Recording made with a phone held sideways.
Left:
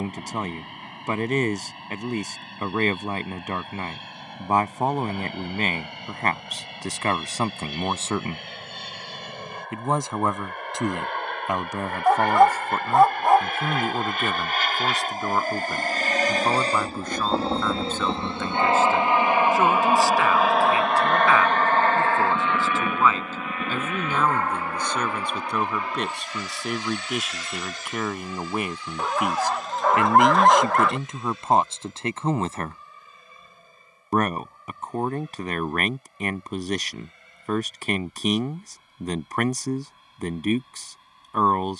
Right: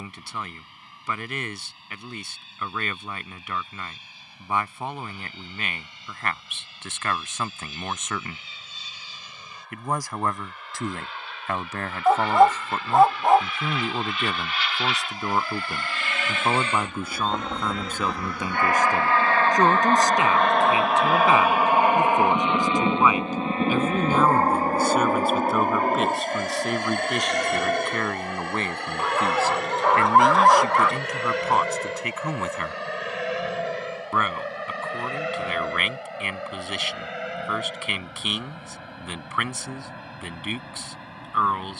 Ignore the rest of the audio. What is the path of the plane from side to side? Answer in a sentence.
You can hear the plane move from left to right.